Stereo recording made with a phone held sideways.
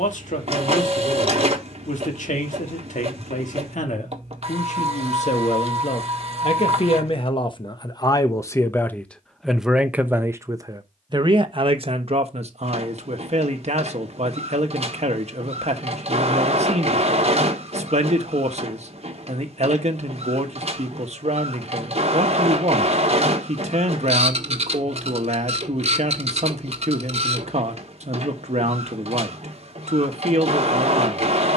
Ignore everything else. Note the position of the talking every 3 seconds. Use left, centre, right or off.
left, left, left, right, right, right, right, right, right, right, right.